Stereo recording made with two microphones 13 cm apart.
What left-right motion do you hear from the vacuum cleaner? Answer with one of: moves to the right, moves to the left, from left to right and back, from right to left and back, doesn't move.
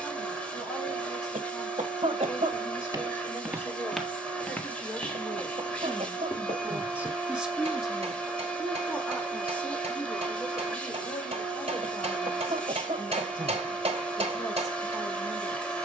doesn't move.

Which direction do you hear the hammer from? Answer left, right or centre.
right.